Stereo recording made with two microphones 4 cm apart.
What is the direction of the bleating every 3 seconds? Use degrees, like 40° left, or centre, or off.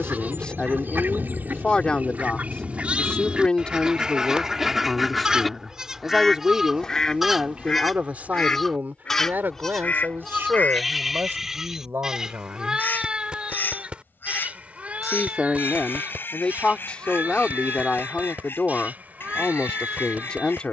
30° right, 20° right, centre, centre, 20° right, 30° right, 40° right.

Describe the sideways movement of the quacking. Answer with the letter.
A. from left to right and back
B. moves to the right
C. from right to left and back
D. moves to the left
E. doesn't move
D.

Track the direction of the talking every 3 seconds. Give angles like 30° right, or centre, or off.
20° left, 10° left, 30° right, 50° right, 50° right, 20° left, 20° left.